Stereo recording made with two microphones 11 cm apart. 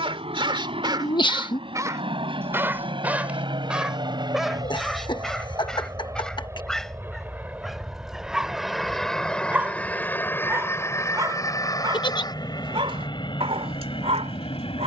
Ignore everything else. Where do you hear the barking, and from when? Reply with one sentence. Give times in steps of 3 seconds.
In this clip you hear the barking on the right from 0 s, in the centre from 3 s and on the right from 9 s.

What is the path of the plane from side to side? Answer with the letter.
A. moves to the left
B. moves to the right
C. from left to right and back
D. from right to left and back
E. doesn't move
A.